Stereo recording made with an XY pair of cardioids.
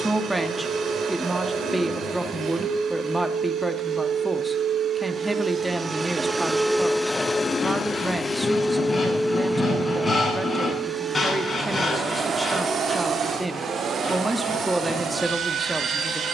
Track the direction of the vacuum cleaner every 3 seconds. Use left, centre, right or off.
right, right, centre, right, right, right.